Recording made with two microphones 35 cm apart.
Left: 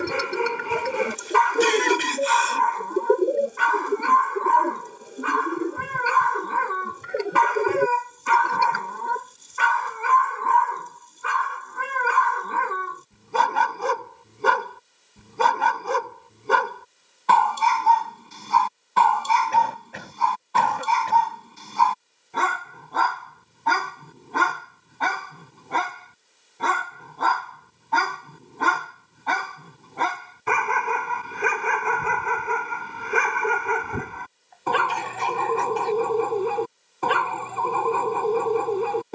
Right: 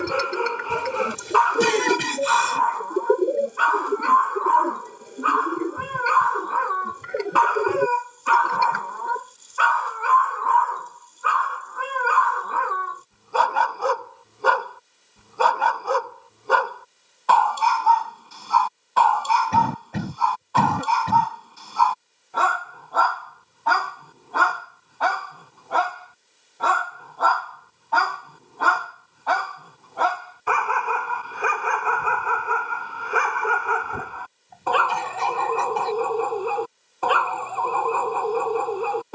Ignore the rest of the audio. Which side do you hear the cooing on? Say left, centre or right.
centre.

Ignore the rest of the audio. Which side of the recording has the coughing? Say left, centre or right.
right.